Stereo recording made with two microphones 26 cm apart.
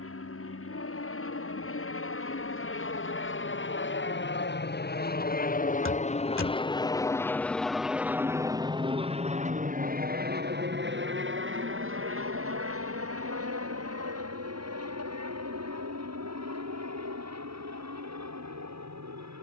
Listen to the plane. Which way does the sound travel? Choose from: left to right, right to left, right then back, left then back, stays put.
left to right.